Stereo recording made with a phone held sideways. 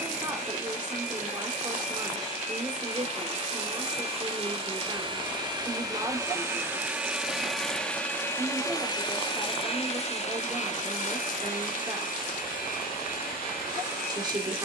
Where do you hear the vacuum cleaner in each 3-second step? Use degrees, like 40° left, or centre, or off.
50° right, 40° right, centre, 50° left, 70° left.